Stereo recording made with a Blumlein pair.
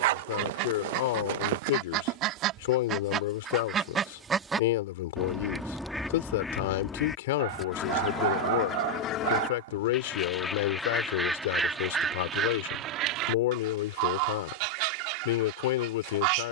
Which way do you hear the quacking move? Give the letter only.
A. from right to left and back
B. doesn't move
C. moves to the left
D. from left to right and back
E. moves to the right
A.